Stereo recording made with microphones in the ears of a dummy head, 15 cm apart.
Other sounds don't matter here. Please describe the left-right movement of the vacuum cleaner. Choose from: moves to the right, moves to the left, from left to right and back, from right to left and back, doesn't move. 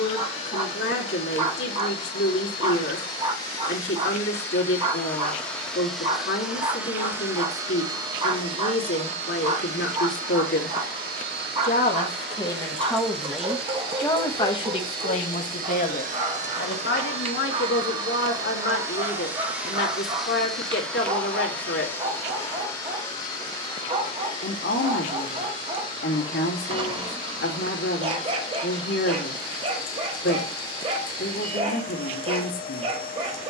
from left to right and back.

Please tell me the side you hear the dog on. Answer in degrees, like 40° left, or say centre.
30° right.